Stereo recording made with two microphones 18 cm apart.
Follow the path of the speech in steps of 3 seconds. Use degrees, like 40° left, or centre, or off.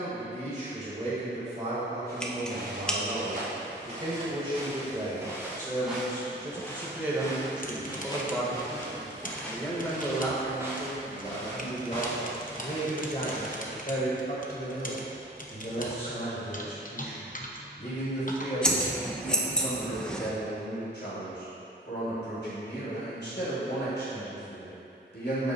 40° right, 30° right, 10° right, 20° left, 40° left, 60° left, 70° left, 70° left, 70° left.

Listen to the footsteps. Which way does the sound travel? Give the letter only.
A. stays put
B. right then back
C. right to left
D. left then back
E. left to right
D.